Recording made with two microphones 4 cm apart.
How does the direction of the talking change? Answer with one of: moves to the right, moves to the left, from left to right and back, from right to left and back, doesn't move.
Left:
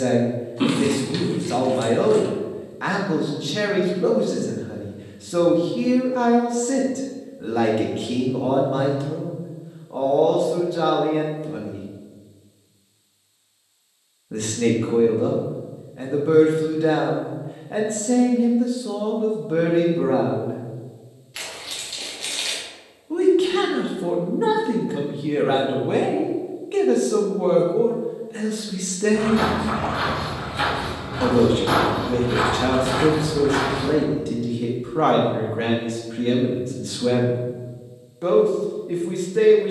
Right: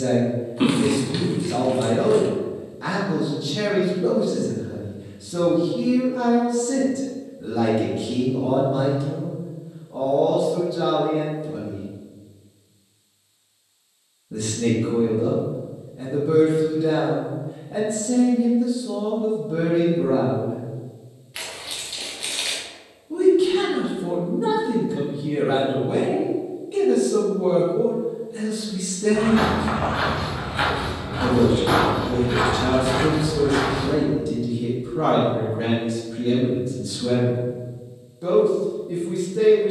doesn't move.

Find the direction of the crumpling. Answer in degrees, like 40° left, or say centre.
10° right.